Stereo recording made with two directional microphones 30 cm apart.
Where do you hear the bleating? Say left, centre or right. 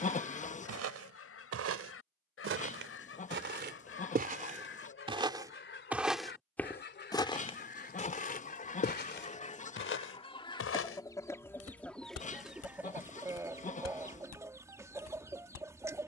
left.